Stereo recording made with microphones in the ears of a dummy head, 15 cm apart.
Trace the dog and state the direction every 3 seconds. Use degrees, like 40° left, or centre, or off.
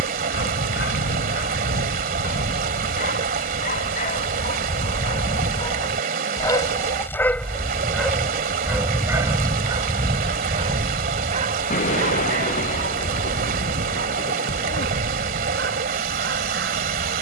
60° left, 40° left, 10° left, 30° right, 50° right, 60° right.